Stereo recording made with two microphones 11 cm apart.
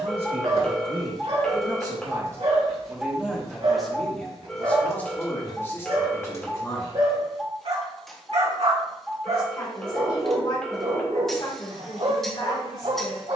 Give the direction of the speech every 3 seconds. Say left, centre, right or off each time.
right, centre, left, left, left.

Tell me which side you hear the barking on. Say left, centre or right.
right.